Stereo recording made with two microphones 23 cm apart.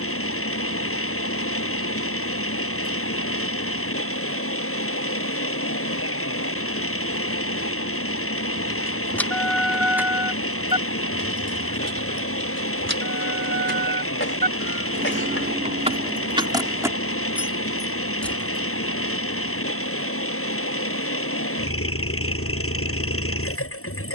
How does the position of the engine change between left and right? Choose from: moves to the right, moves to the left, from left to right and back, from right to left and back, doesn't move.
doesn't move.